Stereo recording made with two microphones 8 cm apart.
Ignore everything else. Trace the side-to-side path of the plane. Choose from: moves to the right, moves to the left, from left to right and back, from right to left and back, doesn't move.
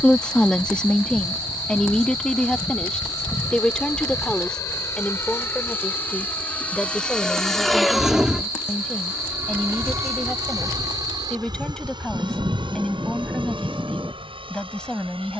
moves to the right.